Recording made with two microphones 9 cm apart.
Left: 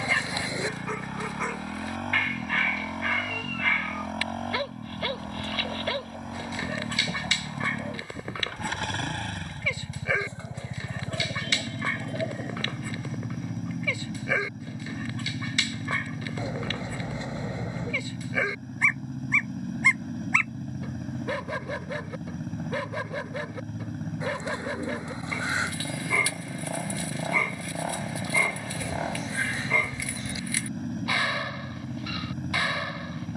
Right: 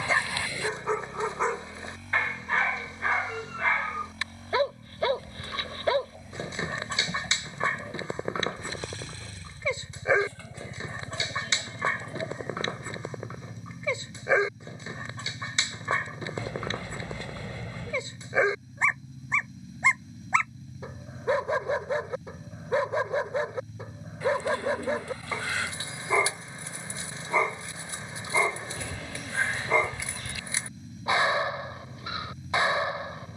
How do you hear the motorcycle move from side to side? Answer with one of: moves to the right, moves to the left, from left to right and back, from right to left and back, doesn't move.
doesn't move.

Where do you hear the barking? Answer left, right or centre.
right.